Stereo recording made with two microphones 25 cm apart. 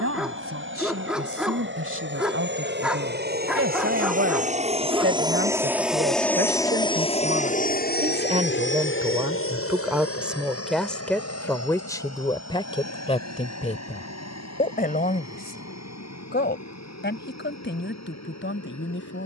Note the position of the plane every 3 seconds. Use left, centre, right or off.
right, right, left, left, left, left, left.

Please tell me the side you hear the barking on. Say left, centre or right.
centre.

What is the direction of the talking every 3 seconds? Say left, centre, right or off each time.
right, right, right, centre, left, left, left.